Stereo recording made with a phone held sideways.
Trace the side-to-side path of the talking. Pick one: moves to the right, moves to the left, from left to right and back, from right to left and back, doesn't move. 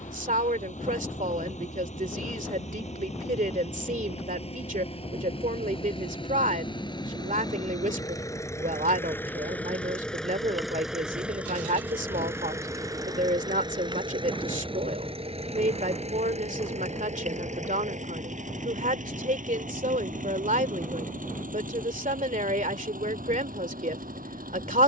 doesn't move.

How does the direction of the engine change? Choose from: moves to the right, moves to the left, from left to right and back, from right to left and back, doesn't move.
moves to the right.